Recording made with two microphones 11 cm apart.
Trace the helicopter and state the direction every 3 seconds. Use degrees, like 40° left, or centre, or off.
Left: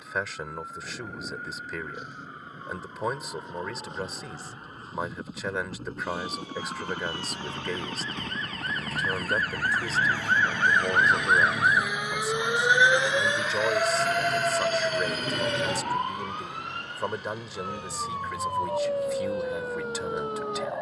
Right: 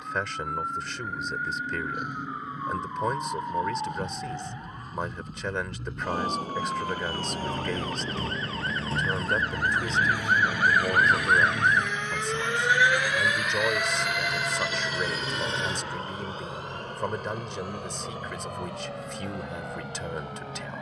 50° left, 50° left, 40° left, 30° left, centre, 40° right, 70° right.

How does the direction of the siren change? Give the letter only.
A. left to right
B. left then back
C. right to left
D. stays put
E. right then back
C.